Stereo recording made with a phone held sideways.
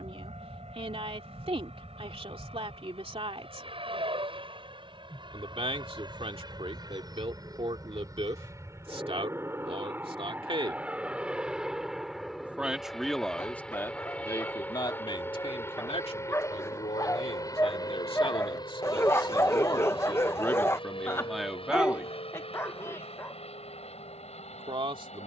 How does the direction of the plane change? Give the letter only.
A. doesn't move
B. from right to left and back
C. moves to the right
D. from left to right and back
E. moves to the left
E.